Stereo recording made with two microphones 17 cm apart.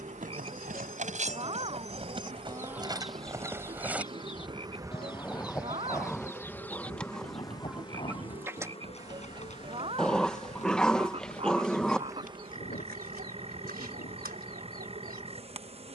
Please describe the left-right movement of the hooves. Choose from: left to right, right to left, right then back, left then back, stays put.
right to left.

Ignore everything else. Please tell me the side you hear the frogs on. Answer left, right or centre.
right.